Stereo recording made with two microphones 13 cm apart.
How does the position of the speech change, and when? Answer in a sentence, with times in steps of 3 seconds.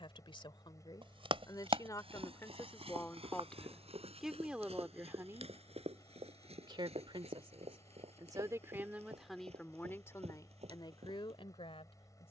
You can hear the speech on the left from 0 s, in the centre from 3 s, on the right from 6 s and on the left from 9 s.